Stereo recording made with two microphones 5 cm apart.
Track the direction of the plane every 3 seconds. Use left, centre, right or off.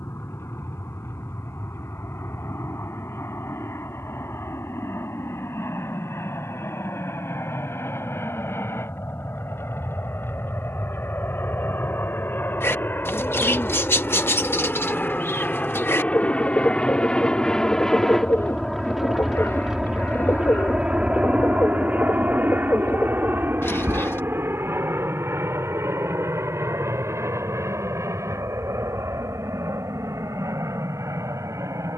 left, left, left, left, left, left, centre, right, right, right, right.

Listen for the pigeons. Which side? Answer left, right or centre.
left.